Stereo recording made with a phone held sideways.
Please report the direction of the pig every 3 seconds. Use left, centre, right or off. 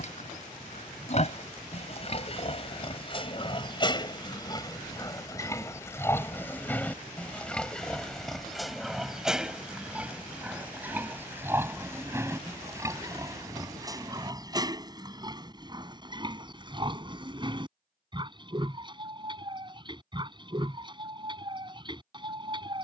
left, left, centre, centre, right, right, right, right.